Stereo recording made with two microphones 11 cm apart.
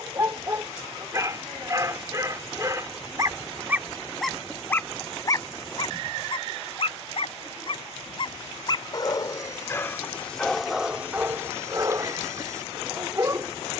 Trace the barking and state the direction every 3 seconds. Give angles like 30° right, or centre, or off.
30° right, 10° left, 50° left, centre, 30° right.